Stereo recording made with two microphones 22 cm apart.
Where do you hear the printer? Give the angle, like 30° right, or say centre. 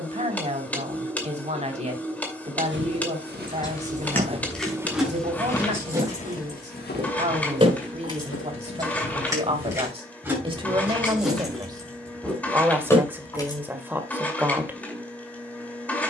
10° left.